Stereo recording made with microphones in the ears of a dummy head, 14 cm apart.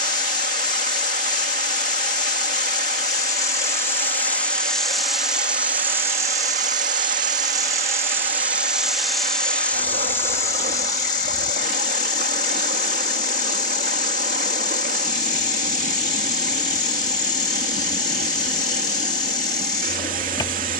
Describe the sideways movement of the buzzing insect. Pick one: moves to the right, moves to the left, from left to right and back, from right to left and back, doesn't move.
from left to right and back.